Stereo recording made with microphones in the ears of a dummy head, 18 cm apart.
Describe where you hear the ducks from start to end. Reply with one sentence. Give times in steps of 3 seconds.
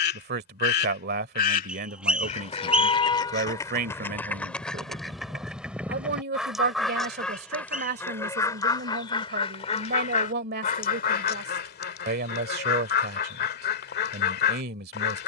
In this clip you hear the ducks on the left from 0 s, in the centre from 3 s and on the left from 9 s.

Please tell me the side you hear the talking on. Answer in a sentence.
You can hear the talking on the right.